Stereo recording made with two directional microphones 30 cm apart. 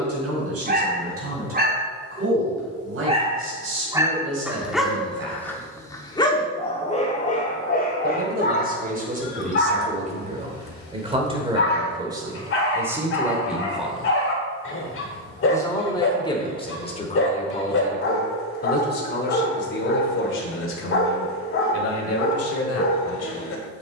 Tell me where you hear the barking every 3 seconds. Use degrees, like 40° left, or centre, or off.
30° right, 10° right, 30° left, 40° left, 40° left, 40° left, 40° left, 40° left.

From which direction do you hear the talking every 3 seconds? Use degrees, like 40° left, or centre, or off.
50° right, 40° right, 30° right, 20° right, 10° right, 20° left, 40° left, 50° left.